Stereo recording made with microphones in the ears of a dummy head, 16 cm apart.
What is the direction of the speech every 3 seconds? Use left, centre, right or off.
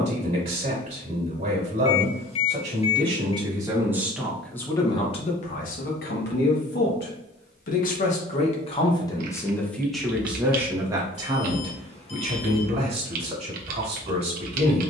right, centre, left, centre, right.